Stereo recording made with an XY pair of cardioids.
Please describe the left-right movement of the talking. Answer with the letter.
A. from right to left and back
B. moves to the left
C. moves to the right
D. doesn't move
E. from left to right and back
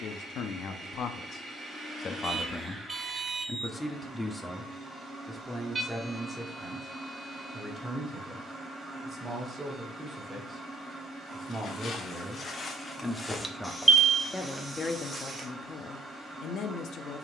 E.